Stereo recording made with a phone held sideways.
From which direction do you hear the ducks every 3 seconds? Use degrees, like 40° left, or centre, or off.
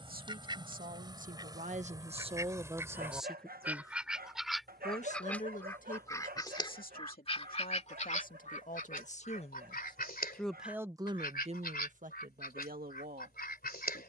20° right, centre, 40° left, 70° left, 70° left.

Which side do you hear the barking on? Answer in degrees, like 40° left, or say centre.
70° right.